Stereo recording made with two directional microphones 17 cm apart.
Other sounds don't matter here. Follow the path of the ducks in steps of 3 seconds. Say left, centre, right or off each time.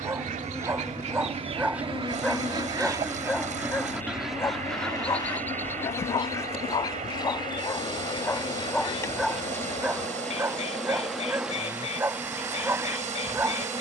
right, centre, left, left, left.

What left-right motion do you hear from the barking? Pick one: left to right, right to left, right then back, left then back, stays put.
left then back.